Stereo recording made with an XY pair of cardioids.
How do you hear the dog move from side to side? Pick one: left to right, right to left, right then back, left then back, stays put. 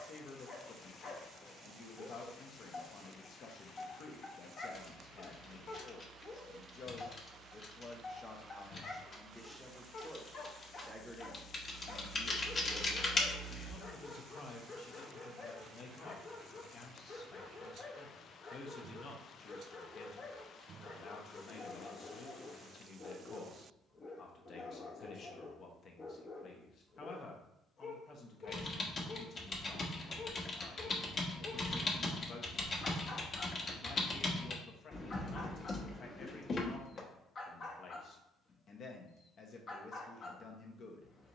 stays put.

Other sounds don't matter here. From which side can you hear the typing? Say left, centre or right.
left.